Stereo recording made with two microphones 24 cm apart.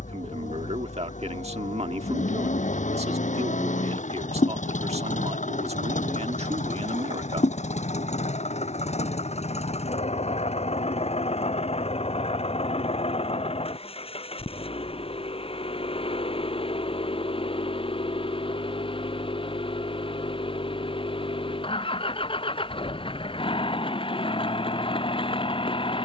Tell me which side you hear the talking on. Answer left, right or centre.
right.